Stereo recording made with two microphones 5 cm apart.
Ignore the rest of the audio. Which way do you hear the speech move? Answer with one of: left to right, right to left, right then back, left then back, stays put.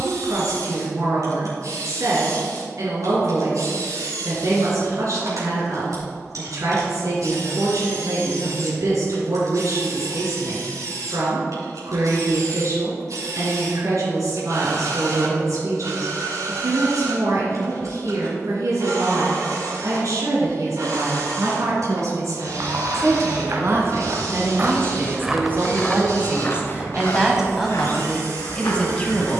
right to left.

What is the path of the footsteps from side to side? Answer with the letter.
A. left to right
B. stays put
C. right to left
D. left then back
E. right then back
C.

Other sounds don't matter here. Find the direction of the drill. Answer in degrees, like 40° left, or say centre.
70° right.